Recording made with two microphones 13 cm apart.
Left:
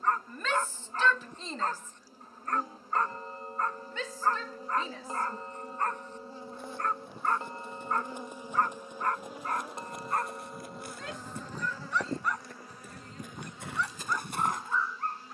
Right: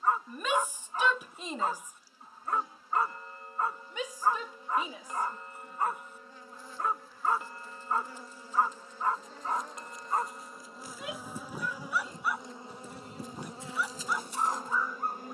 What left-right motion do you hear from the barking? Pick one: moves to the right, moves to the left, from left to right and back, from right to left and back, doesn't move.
doesn't move.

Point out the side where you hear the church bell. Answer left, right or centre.
left.